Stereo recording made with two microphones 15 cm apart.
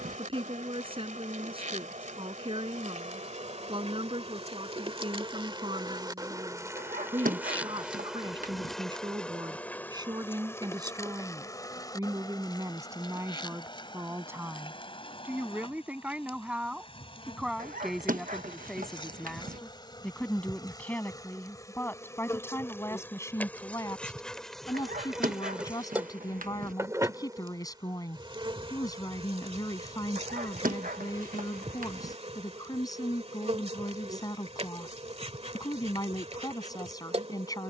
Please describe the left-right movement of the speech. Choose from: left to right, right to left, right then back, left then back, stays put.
right to left.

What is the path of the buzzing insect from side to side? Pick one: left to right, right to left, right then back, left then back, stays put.
left then back.